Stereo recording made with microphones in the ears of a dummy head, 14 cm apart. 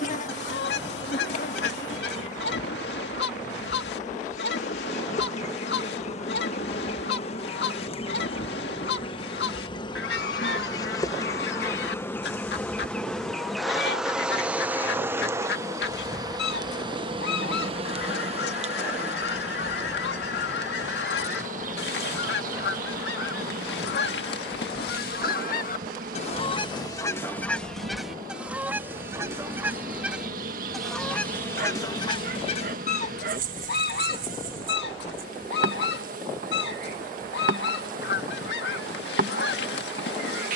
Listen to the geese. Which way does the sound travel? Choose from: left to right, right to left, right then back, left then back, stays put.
right then back.